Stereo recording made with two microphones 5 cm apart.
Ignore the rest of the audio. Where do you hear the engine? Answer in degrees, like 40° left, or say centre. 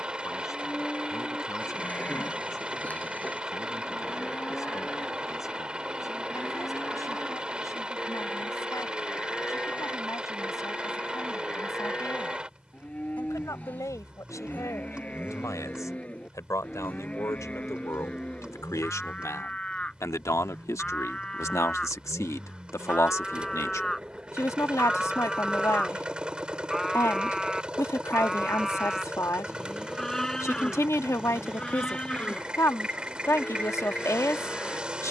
20° right.